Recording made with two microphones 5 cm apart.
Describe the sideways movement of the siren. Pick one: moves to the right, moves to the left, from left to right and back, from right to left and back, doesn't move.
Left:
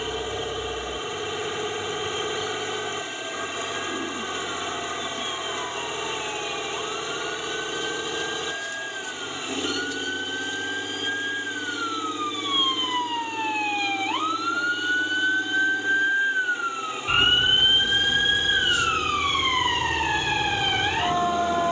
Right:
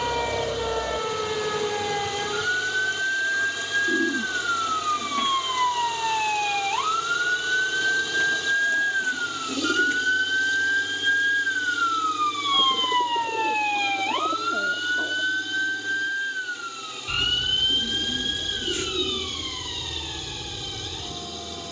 moves to the left.